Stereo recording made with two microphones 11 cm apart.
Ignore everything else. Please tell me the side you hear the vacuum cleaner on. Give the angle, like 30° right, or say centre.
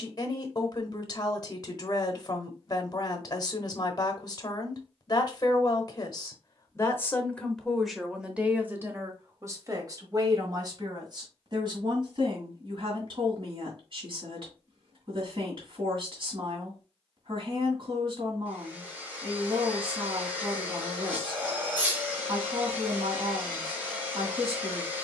20° right.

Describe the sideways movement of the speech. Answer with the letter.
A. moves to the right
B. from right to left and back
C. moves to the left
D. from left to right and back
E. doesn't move
A.